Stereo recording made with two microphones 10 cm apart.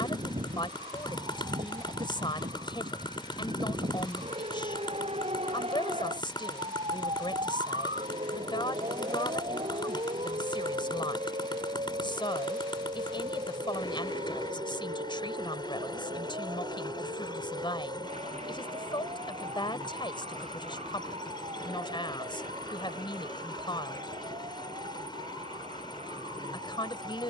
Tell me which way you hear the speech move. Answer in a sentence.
In this clip you hear the speech stay in one place.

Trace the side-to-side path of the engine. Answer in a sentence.
You can hear the engine stay put.